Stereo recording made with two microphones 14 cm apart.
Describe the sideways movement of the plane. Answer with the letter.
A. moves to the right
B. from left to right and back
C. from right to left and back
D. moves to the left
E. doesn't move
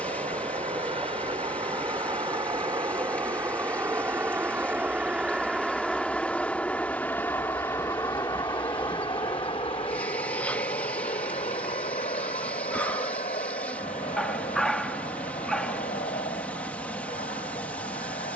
D.